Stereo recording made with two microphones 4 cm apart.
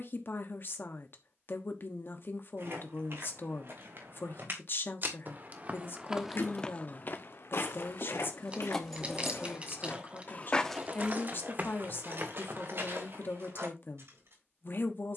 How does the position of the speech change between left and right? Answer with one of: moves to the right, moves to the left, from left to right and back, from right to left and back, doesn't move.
doesn't move.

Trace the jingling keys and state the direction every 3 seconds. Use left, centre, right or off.
off, off, left, right, right.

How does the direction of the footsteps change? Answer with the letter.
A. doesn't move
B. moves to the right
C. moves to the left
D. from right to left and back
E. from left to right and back
D.